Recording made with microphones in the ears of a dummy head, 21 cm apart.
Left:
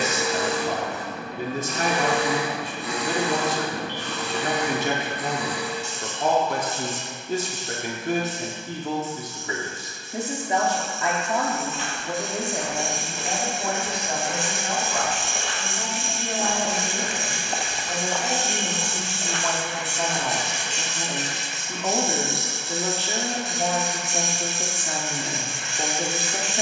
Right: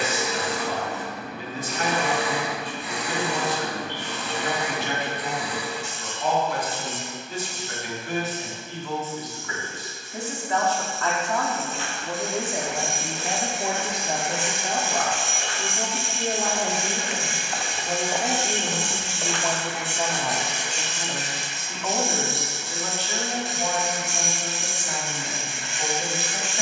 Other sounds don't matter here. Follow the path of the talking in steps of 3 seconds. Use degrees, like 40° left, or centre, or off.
40° left, 40° left, 40° left, 20° left, 10° right, 30° right, 10° right, 20° left, 30° left.